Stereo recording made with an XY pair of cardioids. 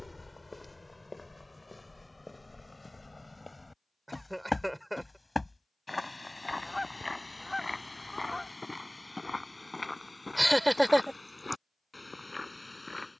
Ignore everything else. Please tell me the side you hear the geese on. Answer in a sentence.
In this clip you hear the geese in the centre.